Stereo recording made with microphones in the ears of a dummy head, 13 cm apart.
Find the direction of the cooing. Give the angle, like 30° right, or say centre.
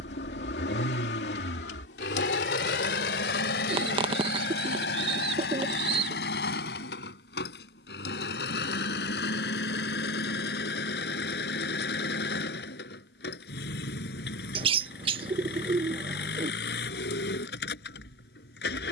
40° right.